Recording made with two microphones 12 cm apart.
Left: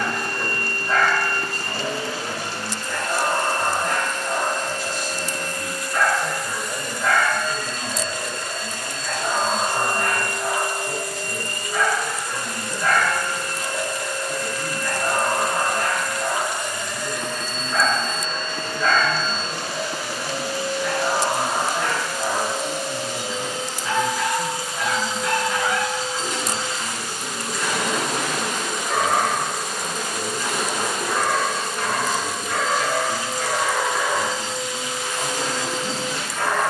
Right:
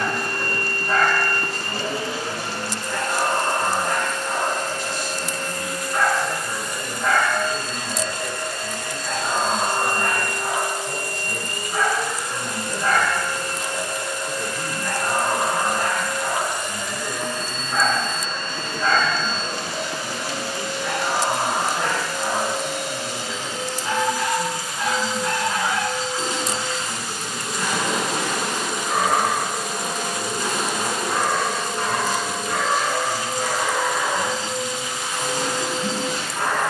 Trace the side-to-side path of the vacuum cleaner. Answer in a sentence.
You can hear the vacuum cleaner move from right to left and back again.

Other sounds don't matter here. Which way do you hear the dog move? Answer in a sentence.
In this clip you hear the dog stay put.